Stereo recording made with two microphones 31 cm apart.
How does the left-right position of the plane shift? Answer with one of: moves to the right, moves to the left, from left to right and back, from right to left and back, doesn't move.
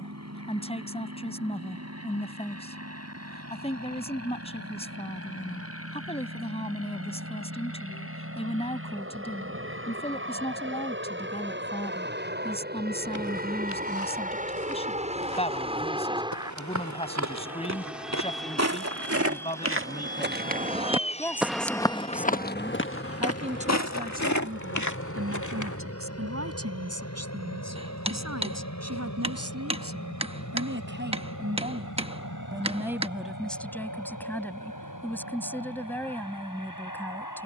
moves to the left.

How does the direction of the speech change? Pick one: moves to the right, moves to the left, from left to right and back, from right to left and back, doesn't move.
from left to right and back.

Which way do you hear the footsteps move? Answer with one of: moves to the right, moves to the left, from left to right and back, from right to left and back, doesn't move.
moves to the left.